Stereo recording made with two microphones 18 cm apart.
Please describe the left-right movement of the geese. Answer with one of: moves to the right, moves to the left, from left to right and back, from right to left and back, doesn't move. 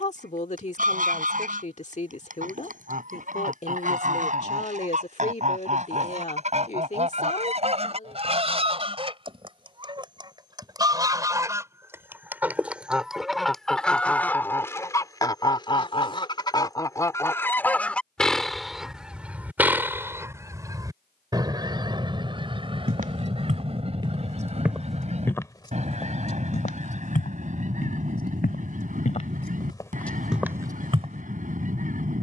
from right to left and back.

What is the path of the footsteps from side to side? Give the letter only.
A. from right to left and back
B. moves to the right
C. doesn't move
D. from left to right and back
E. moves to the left
A.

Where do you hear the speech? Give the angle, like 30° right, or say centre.
40° left.